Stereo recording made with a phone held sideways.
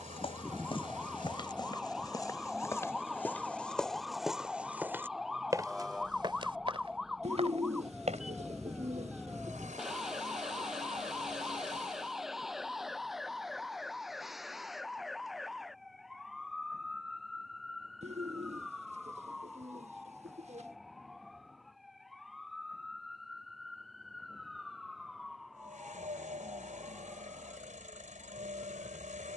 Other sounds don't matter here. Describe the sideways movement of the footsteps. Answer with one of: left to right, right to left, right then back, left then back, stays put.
left to right.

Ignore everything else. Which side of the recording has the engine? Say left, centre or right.
right.